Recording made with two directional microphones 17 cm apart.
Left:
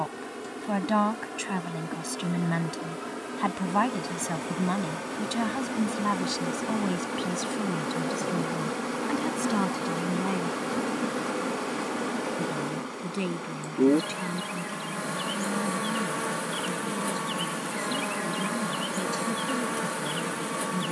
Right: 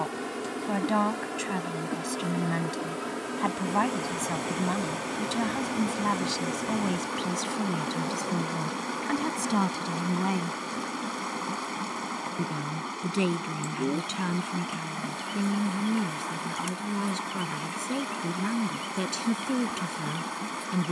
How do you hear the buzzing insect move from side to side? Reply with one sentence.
You can hear the buzzing insect travel towards the left.